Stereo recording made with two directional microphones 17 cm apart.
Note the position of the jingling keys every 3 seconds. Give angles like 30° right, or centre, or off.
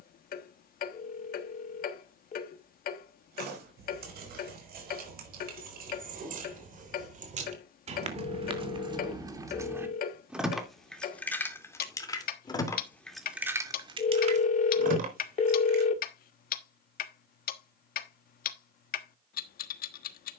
off, 60° right, 40° right, centre, 10° right, 60° right, off.